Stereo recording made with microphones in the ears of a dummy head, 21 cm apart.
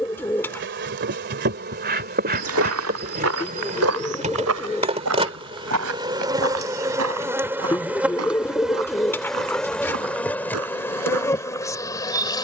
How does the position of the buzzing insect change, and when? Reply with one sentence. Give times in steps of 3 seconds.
In this clip you hear the buzzing insect on the right from 0 s and in the centre from 6 s.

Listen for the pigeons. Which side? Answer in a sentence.
In this clip you hear the pigeons in the centre.